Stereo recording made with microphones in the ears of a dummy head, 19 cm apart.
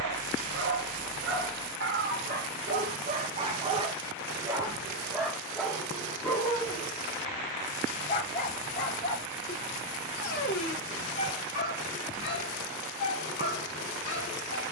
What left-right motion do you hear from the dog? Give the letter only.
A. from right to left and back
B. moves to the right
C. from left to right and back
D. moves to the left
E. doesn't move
D.